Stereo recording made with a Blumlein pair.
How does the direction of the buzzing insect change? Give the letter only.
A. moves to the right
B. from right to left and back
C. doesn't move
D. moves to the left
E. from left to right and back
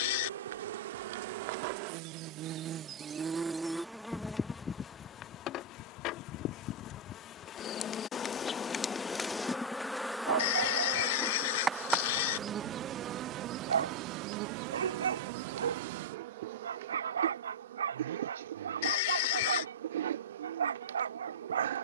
B.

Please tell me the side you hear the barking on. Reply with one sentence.
In this clip you hear the barking on the right.